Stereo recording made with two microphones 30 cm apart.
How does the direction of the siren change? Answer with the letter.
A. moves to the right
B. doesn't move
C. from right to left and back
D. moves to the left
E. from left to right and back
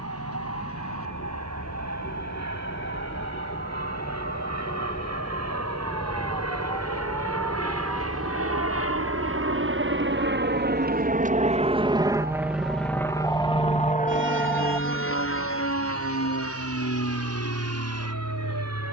A.